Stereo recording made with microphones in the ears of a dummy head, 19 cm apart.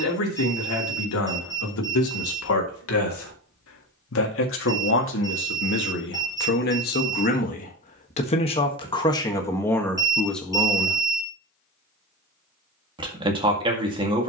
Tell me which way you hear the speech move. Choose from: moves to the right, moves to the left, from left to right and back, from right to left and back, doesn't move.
moves to the right.